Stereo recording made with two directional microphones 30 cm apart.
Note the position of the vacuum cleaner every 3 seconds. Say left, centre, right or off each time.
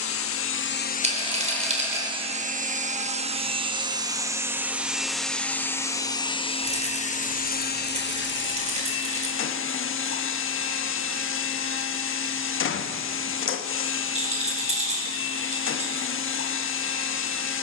centre, centre, left, left, left, left.